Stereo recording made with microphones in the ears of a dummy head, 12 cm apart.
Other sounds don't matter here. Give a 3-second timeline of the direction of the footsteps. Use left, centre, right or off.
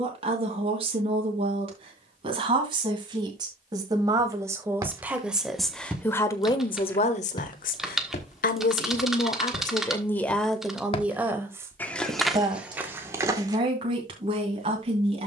off, right, left, left, centre.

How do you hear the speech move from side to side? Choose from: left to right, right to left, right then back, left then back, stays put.
left then back.